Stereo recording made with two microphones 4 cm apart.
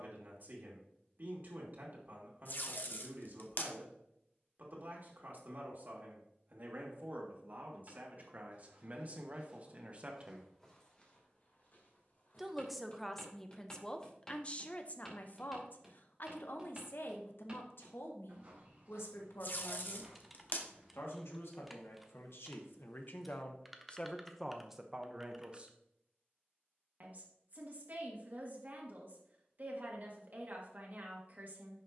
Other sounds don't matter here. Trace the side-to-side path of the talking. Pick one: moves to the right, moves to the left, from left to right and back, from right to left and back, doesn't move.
from right to left and back.